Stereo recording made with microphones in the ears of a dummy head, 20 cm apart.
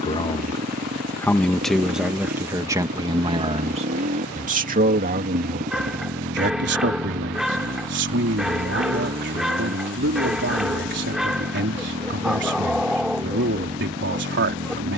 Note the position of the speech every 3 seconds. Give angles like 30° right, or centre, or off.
centre, 40° right, 60° right, 60° right, 60° right.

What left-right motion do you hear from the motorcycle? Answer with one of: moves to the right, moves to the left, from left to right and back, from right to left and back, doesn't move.
doesn't move.